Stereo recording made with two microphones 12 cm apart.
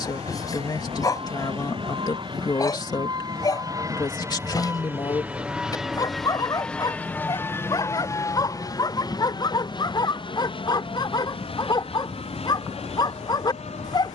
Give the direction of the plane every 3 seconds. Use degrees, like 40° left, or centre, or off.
50° right, 20° right, 20° left, 40° left, 50° left.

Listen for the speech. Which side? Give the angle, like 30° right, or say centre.
40° left.